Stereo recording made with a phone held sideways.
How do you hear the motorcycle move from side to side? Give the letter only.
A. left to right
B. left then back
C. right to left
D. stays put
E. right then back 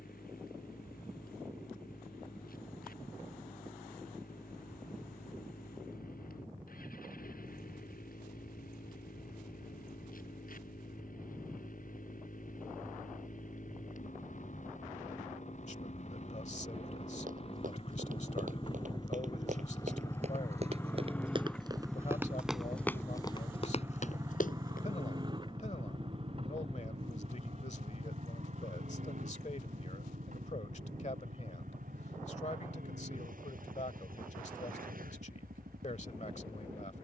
A.